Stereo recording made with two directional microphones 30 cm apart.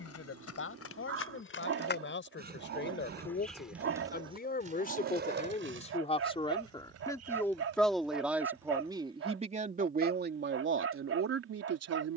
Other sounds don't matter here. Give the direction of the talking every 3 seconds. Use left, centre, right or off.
left, left, centre, right.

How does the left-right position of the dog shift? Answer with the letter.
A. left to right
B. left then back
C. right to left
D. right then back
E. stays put
E.